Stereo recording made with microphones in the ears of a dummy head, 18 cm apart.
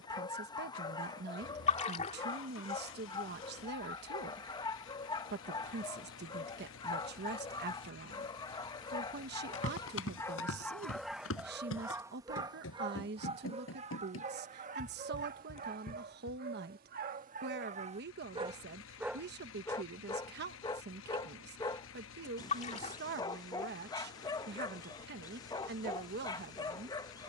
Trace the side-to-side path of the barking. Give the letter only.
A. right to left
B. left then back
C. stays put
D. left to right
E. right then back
E.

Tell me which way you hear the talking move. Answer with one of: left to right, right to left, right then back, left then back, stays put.
stays put.